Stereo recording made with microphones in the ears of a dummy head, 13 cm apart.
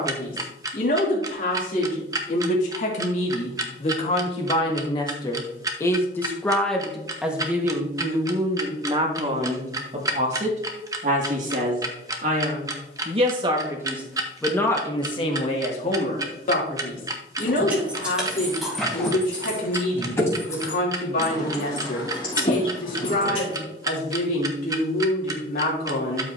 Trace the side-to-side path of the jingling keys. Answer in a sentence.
You can hear the jingling keys go from the right side to the left.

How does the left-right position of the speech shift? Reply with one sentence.
You can hear the speech go right and come back.